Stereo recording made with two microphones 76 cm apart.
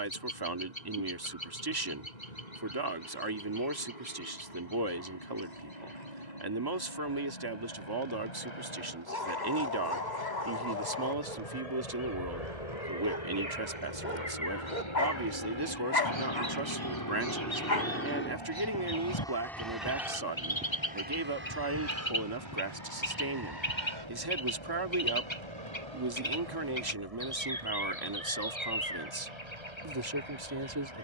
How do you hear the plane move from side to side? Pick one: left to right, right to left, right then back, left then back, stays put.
left to right.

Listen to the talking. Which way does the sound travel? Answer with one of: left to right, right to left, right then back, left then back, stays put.
stays put.